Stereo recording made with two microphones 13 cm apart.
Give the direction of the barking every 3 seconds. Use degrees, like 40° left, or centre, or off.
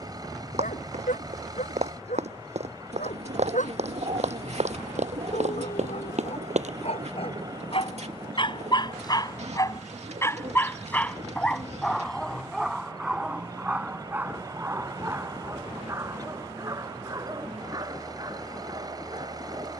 80° left, 70° left, 50° left, 20° left, 10° right, 20° right, 30° right.